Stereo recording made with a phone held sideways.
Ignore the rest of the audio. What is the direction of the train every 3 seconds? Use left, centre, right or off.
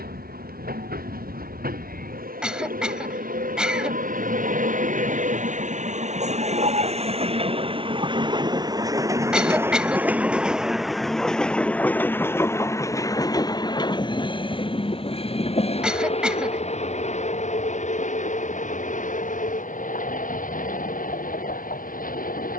right, right, right, centre, left, left, left, left.